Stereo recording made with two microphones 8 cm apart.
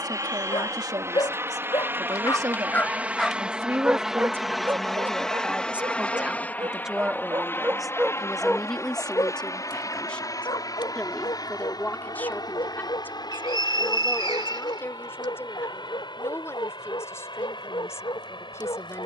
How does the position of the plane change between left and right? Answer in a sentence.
In this clip you hear the plane go from the right side to the left.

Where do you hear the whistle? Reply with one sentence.
In this clip you hear the whistle on the right.